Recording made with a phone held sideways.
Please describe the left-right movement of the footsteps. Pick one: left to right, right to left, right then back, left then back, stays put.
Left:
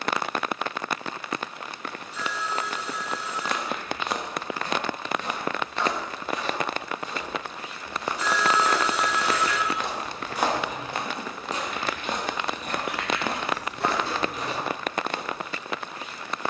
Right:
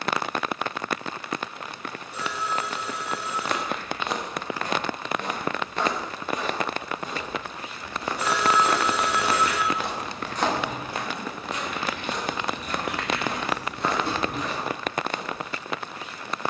right to left.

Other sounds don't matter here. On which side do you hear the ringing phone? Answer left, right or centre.
right.